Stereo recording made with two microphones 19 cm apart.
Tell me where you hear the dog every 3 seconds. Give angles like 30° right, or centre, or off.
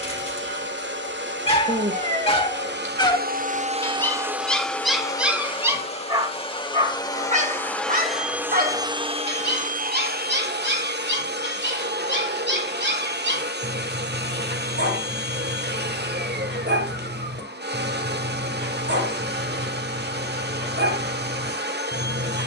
30° left, centre, 40° right, 60° right, 70° right, 70° right, 70° right, 70° right.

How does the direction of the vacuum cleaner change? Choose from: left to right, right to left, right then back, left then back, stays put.
left then back.